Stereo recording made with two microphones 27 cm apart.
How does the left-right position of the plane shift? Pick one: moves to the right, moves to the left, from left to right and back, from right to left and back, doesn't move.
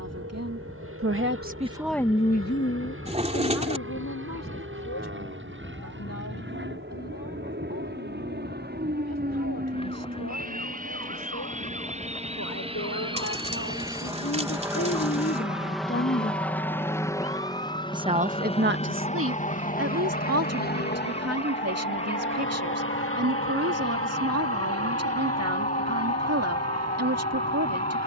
moves to the left.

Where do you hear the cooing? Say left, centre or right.
right.